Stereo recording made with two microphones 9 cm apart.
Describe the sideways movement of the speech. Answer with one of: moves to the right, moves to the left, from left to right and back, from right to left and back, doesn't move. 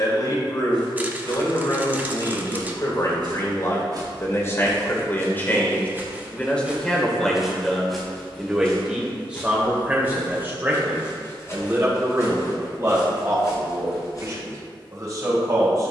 moves to the right.